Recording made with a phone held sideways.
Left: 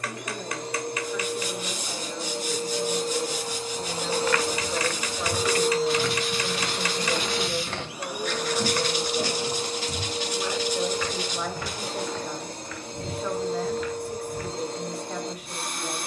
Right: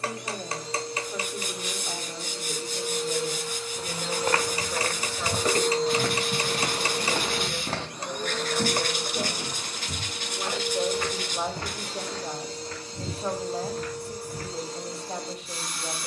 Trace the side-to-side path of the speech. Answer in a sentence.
You can hear the speech move from right to left and back again.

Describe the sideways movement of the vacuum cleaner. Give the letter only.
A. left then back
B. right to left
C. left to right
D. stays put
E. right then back
E.